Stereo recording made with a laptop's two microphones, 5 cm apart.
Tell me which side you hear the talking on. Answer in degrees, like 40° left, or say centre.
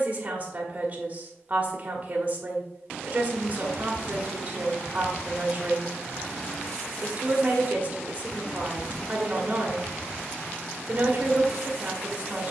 30° right.